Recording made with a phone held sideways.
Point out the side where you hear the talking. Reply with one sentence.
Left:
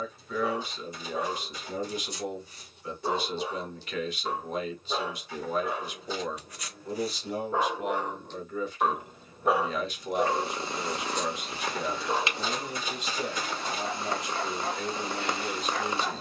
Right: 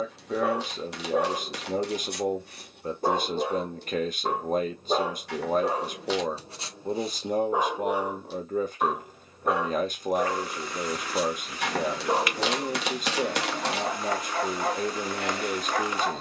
In this clip you hear the talking on the right.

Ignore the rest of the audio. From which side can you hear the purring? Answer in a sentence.
In this clip you hear the purring on the left.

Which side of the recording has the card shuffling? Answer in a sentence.
You can hear the card shuffling on the right.